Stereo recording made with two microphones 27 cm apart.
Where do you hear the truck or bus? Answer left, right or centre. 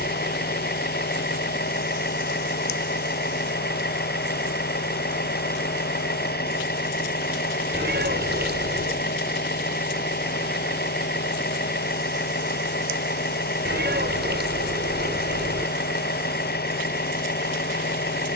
left.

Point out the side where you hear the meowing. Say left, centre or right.
right.